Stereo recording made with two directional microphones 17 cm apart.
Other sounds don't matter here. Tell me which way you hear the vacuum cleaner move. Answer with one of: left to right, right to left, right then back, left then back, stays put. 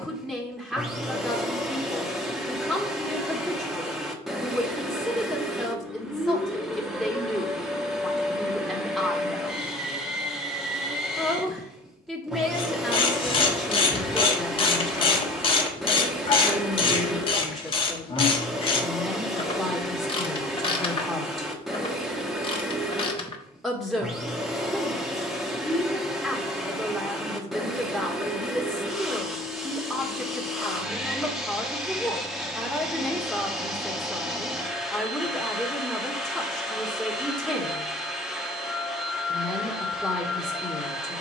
stays put.